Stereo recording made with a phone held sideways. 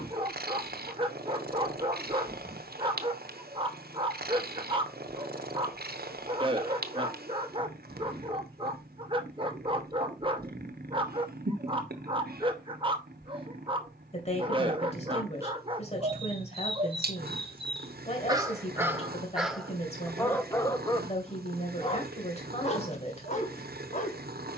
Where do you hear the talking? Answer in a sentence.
In this clip you hear the talking on the left.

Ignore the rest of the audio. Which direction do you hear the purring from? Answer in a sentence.
In this clip you hear the purring on the right.